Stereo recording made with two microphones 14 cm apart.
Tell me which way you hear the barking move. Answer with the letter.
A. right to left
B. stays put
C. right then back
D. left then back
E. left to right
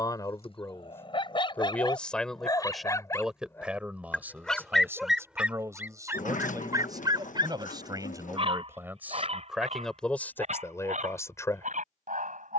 E.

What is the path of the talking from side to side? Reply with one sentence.
In this clip you hear the talking move from left to right and back again.